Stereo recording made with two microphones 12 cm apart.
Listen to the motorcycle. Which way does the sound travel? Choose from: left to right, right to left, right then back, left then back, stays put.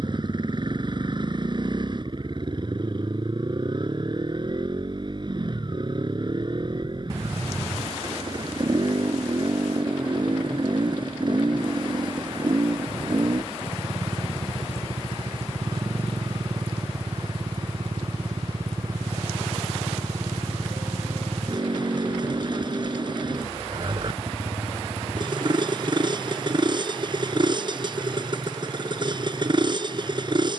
stays put.